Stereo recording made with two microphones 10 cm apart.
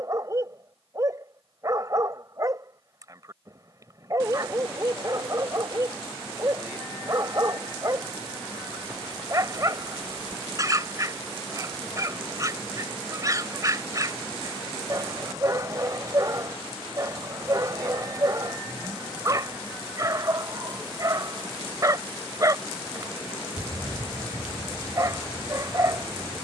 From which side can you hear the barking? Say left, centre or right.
right.